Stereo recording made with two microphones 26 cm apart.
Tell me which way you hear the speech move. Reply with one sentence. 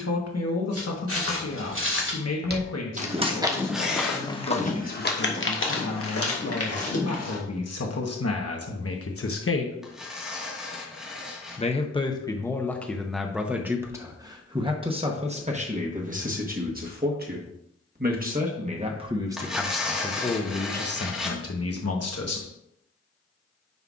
In this clip you hear the speech move from left to right and back again.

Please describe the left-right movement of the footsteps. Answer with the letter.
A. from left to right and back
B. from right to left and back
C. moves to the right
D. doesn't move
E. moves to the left
E.